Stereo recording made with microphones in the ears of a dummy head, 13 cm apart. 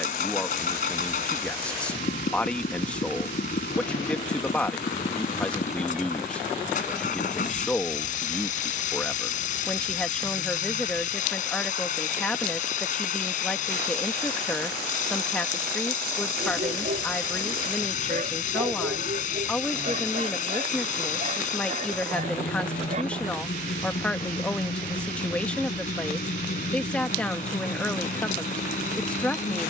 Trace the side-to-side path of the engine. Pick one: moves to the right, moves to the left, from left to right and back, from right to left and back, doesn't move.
doesn't move.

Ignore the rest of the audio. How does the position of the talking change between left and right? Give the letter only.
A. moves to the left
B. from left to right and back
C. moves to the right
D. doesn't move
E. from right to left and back
D.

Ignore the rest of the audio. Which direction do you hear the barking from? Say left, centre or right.
right.